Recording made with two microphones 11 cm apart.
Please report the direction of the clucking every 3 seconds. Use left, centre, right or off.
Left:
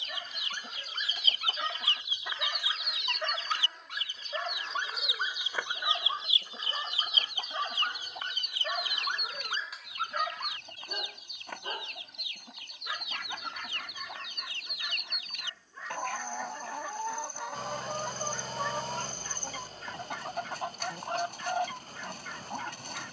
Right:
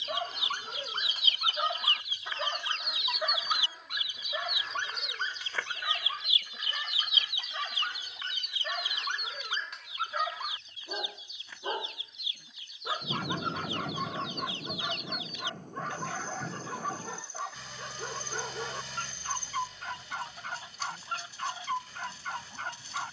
left, centre, left, left, left, left, left, left.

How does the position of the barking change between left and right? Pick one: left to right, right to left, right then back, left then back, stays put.
left then back.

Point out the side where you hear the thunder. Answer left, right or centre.
right.